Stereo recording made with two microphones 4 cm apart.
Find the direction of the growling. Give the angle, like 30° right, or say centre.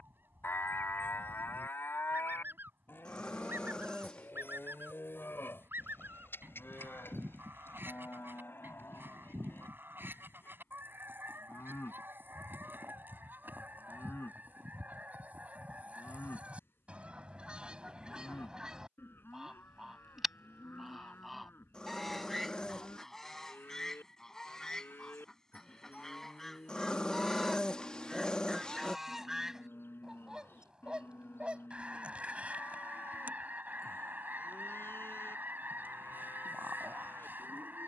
20° left.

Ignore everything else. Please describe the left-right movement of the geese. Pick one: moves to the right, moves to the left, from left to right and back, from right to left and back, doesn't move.
from right to left and back.